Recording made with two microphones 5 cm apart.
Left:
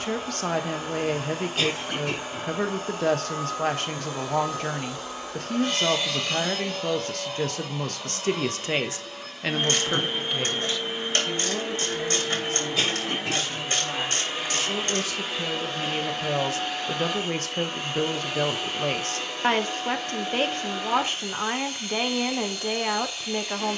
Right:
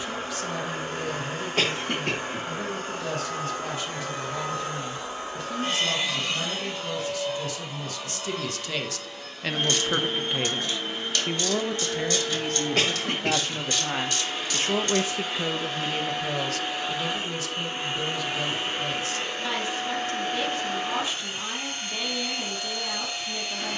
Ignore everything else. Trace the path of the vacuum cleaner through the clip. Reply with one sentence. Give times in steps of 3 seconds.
You can hear the vacuum cleaner on the right from 0 s, in the centre from 6 s and on the right from 18 s.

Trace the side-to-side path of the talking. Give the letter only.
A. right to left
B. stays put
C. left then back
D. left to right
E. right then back
E.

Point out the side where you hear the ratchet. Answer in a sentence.
You can hear the ratchet on the left.